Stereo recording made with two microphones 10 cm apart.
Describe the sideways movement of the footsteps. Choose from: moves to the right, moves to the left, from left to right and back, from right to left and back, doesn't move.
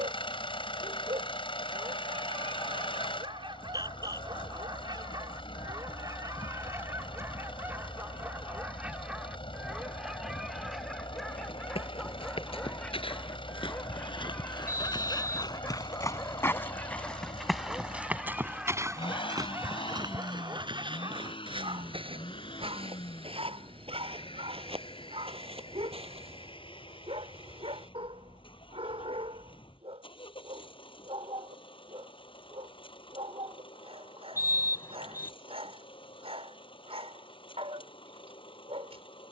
moves to the right.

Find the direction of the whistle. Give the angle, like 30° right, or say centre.
30° left.